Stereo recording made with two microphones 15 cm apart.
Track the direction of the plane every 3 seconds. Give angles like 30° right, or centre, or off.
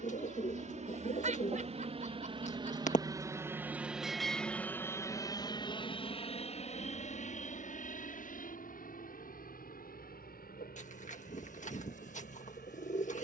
50° right, 10° left, 50° left, 60° left, 70° left.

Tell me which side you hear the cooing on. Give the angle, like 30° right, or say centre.
60° left.